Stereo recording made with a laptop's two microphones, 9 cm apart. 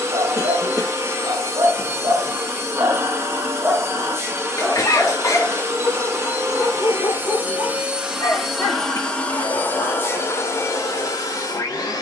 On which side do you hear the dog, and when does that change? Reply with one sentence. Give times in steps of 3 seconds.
You can hear the dog on the right from 0 s, in the centre from 3 s and on the left from 6 s.